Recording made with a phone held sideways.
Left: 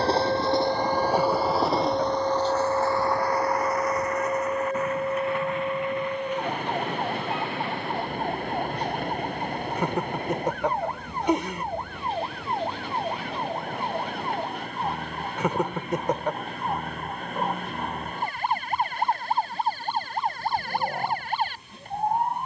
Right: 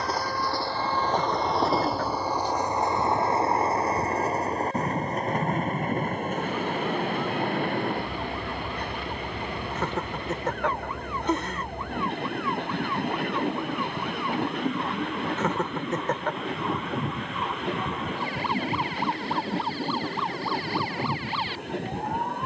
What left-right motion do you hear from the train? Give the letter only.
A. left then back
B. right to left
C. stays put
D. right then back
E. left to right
E.